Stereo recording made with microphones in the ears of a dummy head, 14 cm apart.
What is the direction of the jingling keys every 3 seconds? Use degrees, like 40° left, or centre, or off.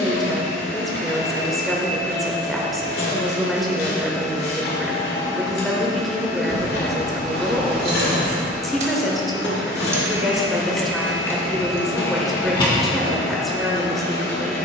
off, off, 60° right, centre, 30° left.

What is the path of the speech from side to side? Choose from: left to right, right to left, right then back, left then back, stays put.
stays put.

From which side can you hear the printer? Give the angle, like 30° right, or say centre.
70° left.